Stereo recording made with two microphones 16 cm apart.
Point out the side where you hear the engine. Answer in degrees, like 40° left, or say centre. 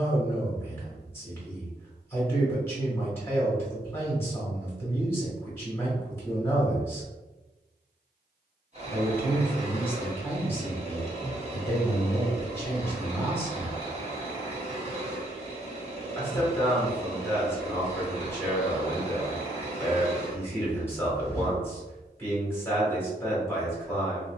40° right.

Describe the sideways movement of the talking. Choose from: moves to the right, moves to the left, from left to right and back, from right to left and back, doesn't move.
doesn't move.